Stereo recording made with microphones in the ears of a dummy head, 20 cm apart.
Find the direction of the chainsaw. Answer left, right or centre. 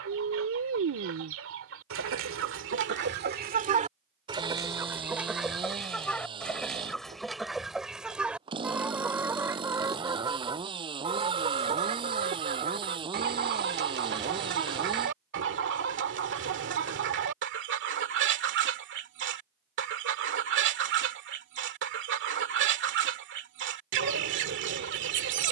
right.